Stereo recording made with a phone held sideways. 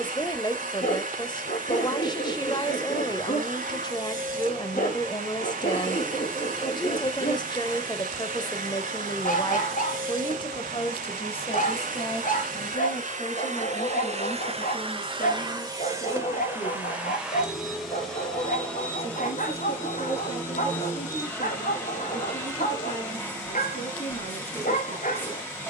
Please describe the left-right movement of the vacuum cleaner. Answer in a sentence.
You can hear the vacuum cleaner go from the right side to the left.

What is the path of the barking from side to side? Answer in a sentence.
You can hear the barking stay in one place.